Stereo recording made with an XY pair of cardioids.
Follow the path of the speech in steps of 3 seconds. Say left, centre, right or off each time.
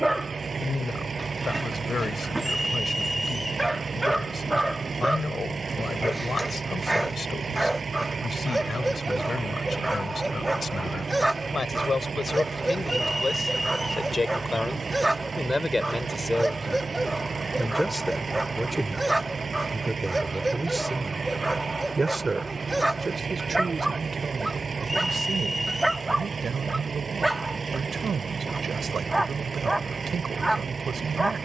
left, left, left, left, left, centre, centre, right, right, right, right.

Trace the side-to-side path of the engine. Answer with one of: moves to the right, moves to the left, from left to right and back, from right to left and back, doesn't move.
doesn't move.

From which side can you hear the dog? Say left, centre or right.
centre.